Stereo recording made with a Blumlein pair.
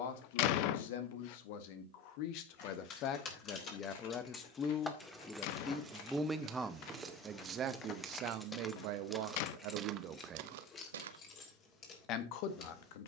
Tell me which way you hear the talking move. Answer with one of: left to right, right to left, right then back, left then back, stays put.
right then back.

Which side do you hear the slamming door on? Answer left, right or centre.
left.